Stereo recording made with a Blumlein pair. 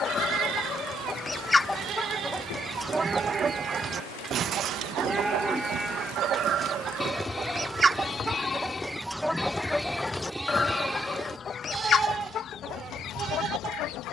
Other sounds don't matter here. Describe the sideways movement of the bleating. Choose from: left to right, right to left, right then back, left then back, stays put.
left then back.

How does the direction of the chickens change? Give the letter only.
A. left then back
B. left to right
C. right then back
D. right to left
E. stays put
C.